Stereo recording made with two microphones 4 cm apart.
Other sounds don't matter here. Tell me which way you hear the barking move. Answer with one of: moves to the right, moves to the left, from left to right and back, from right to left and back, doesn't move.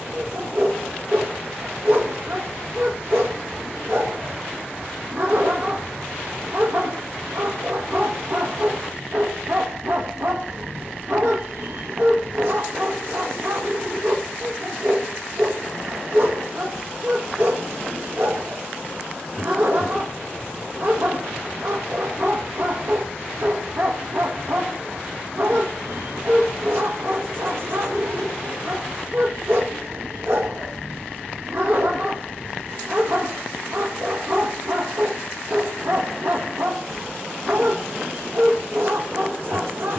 doesn't move.